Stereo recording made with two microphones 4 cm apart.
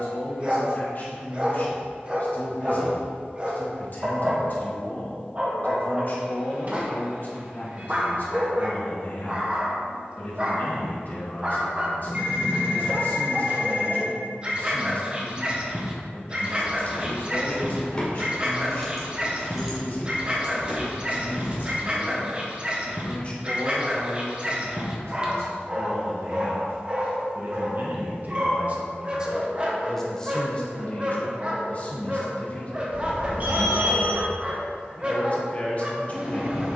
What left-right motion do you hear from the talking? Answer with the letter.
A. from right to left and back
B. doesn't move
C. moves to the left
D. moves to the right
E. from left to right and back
E.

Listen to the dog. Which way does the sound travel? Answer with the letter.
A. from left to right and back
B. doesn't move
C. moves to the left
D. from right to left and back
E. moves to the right
B.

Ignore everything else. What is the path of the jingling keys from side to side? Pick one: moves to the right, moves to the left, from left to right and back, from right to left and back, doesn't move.
moves to the right.